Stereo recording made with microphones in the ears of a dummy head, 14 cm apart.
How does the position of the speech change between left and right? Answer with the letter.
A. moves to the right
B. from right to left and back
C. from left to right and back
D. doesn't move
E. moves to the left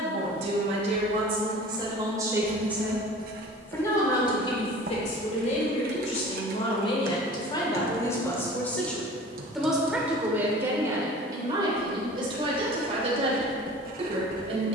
B.